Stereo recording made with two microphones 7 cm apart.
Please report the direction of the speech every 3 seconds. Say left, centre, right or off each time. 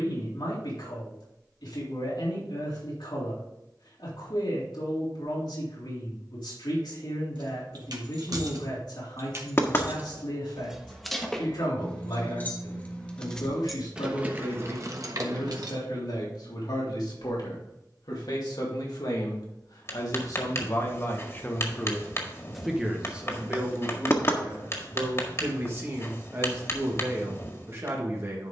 left, left, left, left, left, left, left, centre, right, right.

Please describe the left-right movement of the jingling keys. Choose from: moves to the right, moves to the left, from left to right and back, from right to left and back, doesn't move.
from right to left and back.